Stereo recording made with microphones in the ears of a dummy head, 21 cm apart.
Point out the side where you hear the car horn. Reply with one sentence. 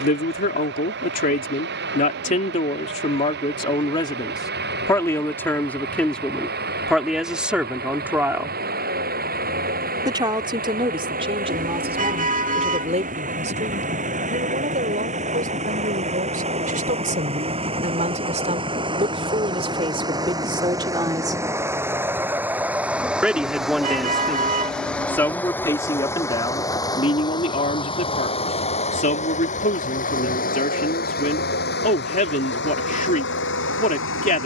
In this clip you hear the car horn on the right.